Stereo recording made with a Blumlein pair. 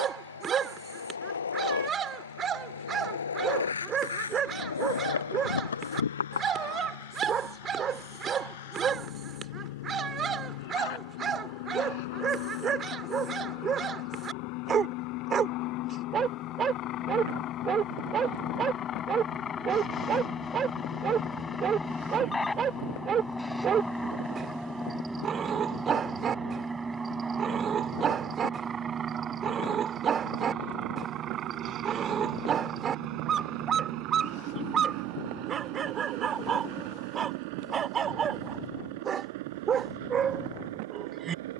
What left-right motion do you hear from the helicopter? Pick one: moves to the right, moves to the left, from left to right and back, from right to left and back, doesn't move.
moves to the right.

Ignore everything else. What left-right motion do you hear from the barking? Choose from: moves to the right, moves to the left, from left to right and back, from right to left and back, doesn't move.
doesn't move.